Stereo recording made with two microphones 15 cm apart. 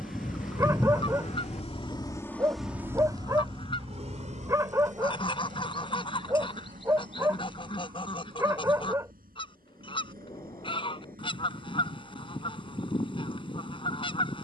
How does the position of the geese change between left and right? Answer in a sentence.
You can hear the geese stay in one place.